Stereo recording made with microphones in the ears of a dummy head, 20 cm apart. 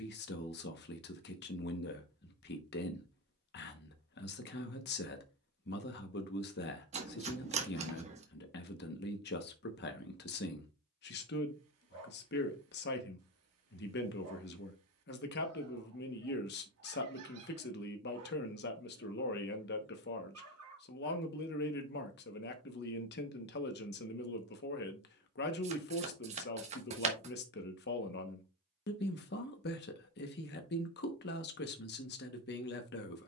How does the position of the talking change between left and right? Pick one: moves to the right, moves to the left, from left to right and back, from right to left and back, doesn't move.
doesn't move.